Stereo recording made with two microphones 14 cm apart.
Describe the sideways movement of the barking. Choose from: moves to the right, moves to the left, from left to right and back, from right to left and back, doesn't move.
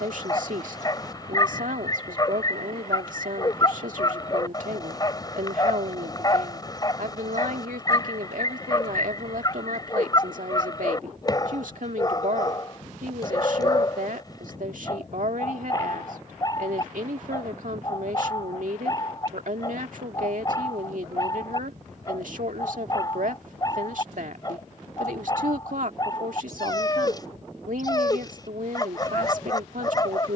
doesn't move.